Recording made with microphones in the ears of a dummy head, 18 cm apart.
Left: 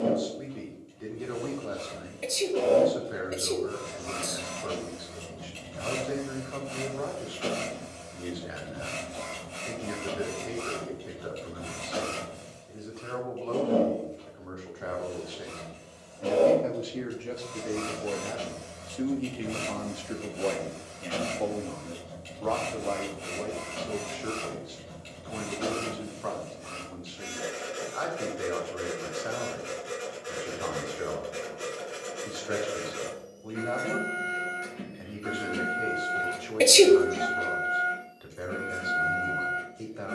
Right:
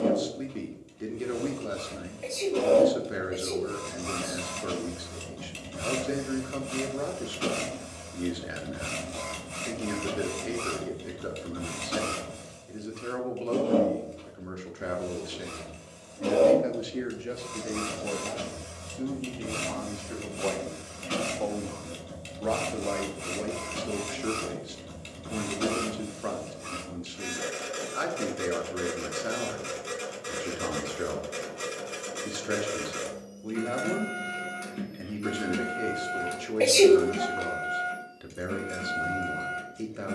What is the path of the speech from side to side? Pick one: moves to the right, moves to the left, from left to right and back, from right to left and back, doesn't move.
from right to left and back.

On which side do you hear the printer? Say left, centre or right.
right.